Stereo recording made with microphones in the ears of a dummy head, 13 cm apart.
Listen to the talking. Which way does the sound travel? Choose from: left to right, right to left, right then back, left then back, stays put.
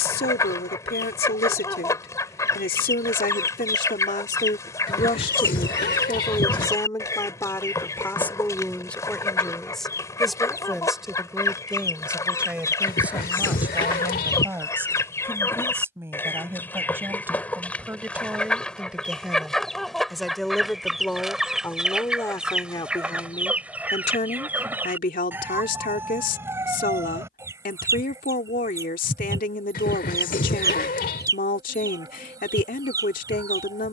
right then back.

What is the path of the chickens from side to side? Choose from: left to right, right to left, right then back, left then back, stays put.
left to right.